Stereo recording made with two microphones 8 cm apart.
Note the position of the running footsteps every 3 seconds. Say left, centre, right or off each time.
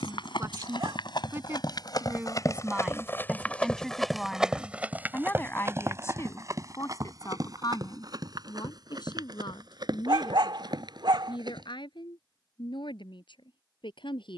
left, centre, right, right, off.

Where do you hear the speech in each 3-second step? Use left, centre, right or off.
right, centre, left, left, left.